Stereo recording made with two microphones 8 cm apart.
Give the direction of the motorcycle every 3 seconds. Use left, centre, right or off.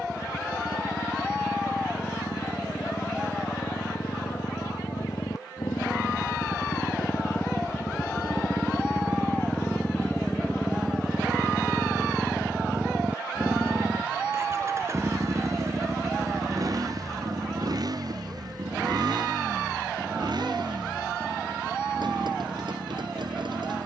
left, left, left, centre, right, right, right, right.